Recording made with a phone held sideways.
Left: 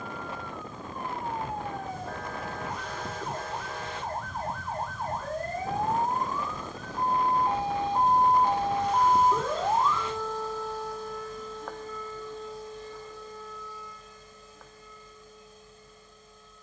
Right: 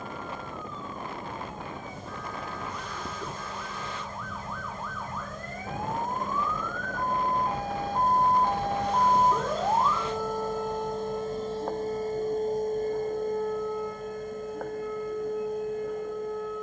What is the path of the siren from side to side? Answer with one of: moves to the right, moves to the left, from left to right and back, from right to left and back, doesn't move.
moves to the right.